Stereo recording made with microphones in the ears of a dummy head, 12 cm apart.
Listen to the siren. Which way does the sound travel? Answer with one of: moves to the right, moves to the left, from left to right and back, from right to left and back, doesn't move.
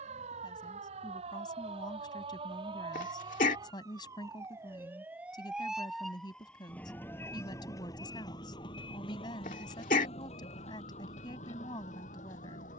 moves to the left.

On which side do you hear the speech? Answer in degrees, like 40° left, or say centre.
30° left.